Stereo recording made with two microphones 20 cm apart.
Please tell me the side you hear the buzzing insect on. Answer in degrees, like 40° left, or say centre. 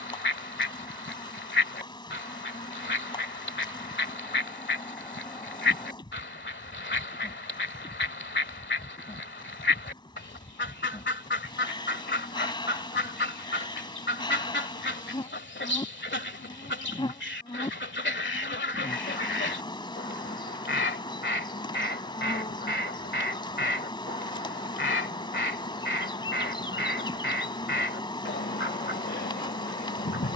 20° left.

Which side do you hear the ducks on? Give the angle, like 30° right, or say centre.
70° left.